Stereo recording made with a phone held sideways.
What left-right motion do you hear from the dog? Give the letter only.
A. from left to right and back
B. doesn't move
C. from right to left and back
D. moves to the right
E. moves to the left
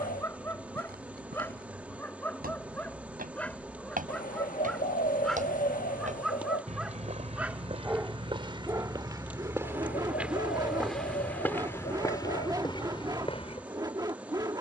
D.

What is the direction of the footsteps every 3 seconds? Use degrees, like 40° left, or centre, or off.
70° right, 60° right, 40° right, centre, 30° left.